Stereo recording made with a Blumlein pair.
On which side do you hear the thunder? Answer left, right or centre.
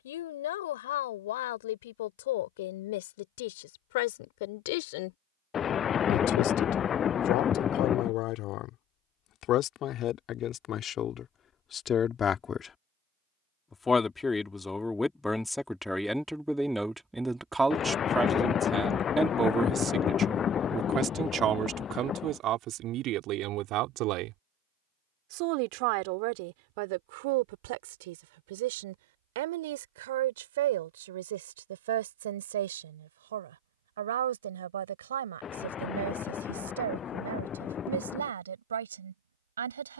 left.